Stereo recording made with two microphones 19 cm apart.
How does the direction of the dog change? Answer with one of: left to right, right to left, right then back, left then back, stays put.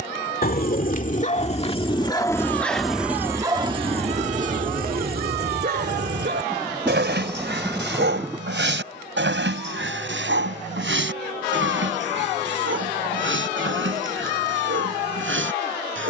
left to right.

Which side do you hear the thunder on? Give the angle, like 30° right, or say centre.
10° right.